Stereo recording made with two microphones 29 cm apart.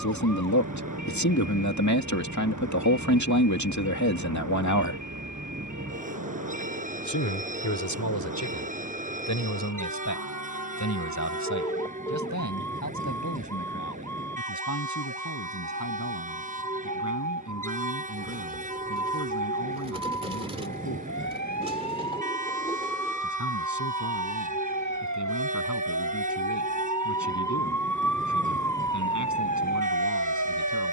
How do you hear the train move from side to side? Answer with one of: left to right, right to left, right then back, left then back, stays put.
stays put.